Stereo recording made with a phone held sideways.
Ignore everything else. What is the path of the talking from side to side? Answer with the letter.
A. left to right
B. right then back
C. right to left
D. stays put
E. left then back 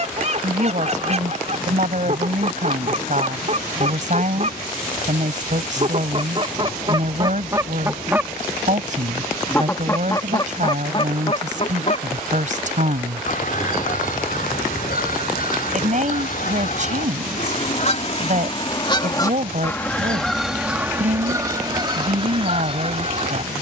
D.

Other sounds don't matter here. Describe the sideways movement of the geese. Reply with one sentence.
You can hear the geese move from right to left and back again.